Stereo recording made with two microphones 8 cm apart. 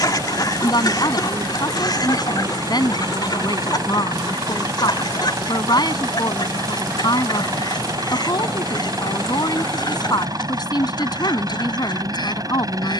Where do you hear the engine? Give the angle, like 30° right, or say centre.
50° right.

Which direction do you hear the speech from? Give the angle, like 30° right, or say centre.
60° left.